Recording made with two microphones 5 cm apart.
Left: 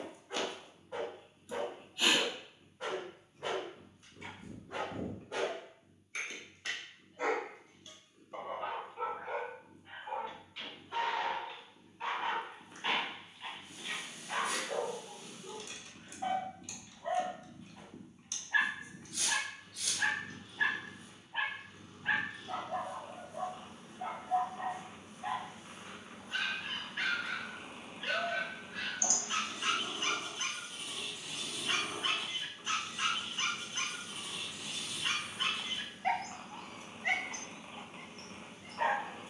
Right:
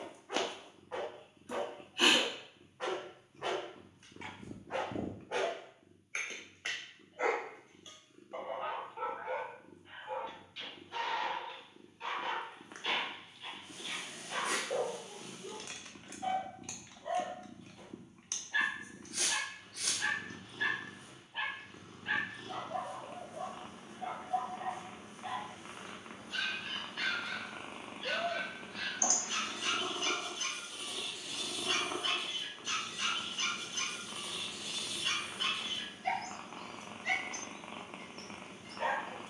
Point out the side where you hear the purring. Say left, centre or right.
right.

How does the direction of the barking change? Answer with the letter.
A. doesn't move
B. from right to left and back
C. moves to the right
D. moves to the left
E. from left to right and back
D.